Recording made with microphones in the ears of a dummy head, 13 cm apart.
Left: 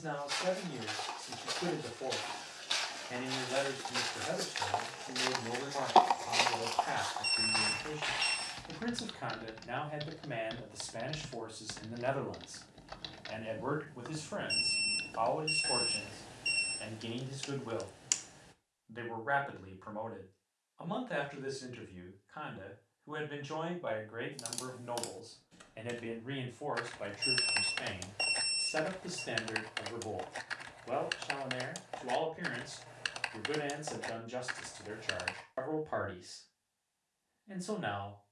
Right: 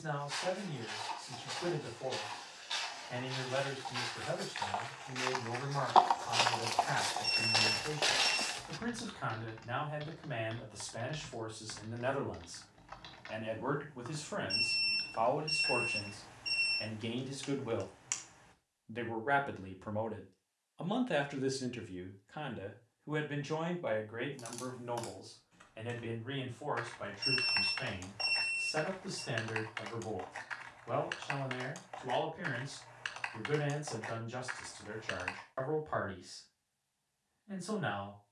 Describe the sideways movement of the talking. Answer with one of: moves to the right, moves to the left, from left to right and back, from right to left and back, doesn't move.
from left to right and back.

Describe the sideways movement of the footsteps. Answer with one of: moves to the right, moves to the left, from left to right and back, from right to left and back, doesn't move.
moves to the right.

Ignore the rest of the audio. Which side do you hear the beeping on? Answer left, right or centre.
left.